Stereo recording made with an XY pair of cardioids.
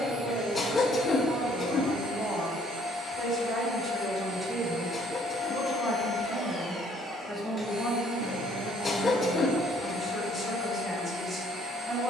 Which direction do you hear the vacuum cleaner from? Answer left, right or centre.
centre.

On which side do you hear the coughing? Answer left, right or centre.
left.